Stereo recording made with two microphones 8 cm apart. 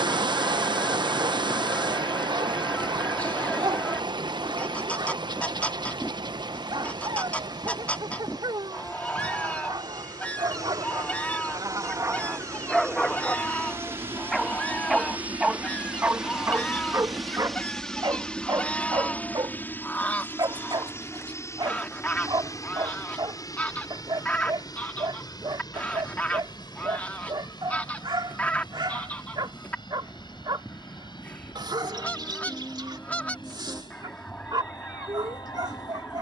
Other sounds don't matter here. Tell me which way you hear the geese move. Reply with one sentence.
You can hear the geese stay put.